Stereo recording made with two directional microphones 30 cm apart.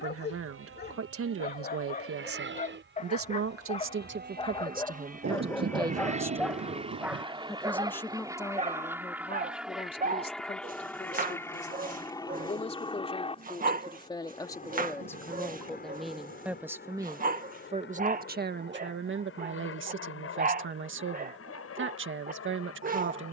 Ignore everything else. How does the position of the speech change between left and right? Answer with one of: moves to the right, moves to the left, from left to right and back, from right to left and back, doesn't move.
from right to left and back.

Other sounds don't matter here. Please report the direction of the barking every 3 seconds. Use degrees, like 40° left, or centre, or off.
30° left, 20° left, 10° right, 30° right, 30° right, 30° right, 30° right, 30° right.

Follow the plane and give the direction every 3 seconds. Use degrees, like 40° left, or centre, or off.
50° right, 30° right, 20° right, centre, 20° left, 30° left, 40° left, 50° left.